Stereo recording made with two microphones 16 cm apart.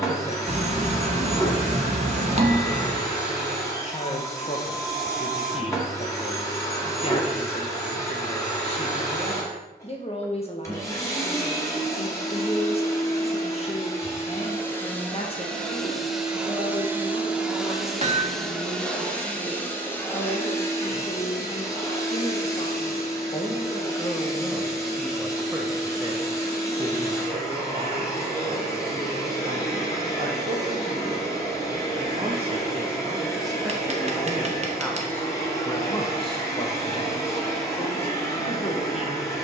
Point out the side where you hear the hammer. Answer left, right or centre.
right.